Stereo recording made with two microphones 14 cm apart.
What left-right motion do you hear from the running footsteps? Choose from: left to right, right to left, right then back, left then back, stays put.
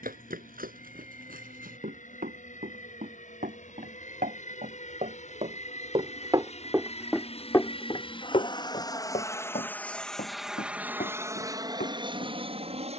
right to left.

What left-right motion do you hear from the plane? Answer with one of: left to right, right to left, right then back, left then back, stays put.
left to right.